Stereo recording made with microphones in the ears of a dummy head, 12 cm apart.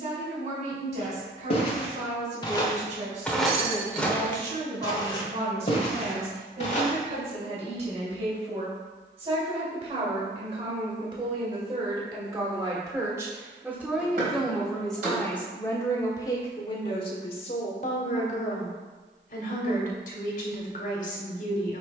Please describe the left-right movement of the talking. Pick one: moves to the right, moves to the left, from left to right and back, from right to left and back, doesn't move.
moves to the left.